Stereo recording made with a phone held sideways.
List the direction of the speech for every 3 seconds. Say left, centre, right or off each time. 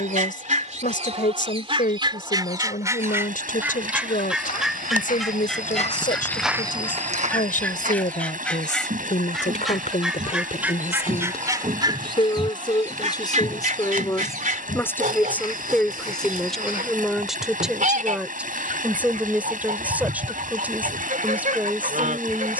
left, left, left, left, left, centre, centre, centre.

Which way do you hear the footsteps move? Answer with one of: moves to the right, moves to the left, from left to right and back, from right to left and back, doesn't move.
from left to right and back.